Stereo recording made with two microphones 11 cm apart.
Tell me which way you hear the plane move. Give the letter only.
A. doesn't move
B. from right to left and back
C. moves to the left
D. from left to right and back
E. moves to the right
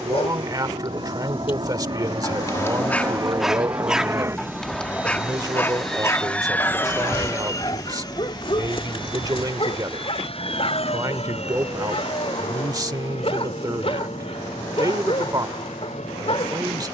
C.